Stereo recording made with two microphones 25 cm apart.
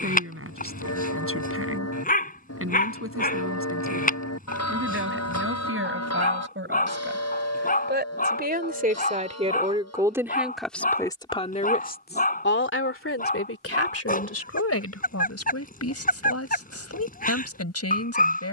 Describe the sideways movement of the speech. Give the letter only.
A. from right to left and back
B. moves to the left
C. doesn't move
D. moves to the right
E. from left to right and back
B.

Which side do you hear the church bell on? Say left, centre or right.
left.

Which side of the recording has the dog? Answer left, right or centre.
left.